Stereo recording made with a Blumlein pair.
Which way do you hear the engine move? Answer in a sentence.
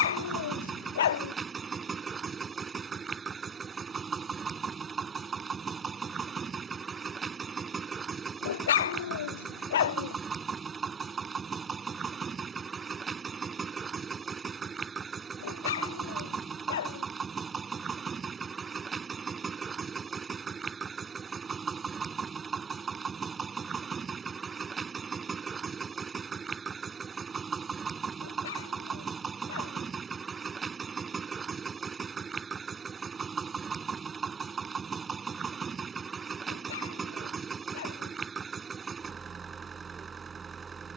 In this clip you hear the engine stay put.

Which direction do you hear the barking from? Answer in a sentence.
In this clip you hear the barking on the left.